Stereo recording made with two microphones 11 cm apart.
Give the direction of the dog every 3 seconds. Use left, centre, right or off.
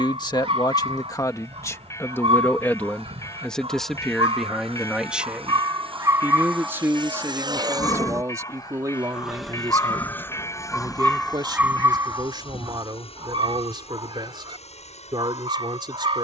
right, right, centre, centre, right, right.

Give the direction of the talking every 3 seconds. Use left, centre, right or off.
left, centre, right, right, right, right.